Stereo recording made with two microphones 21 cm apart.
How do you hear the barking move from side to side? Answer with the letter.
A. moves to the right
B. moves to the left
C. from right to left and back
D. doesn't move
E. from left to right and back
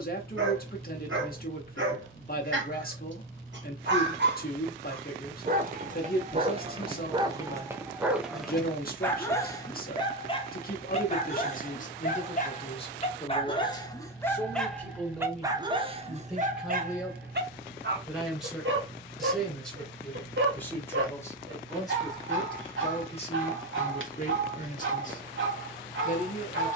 C.